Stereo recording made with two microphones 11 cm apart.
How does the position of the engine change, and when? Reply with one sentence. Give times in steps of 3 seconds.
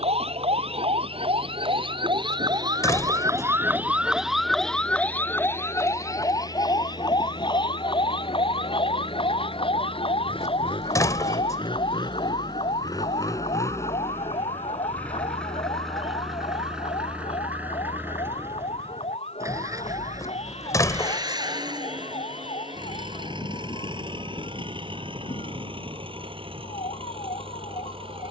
You can hear the engine on the left from 0 s, in the centre from 15 s and on the right from 18 s.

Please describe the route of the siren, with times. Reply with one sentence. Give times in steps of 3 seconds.
In this clip you hear the siren on the right from 0 s, in the centre from 3 s and on the left from 6 s.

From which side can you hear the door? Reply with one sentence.
You can hear the door on the left.